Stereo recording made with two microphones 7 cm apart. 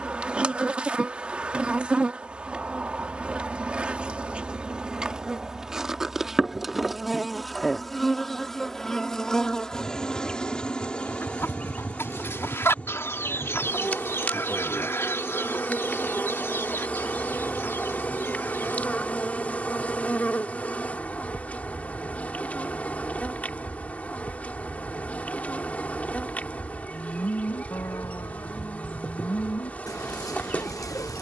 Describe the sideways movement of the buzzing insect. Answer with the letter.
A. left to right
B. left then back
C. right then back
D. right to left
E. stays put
D.